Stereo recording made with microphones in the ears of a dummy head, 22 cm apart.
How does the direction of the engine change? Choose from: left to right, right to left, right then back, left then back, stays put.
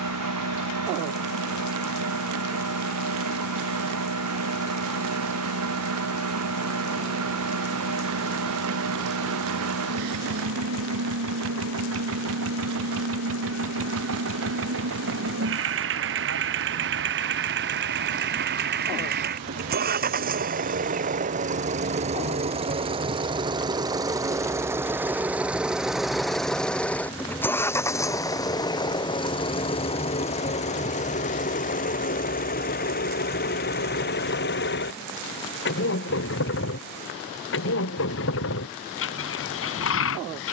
right to left.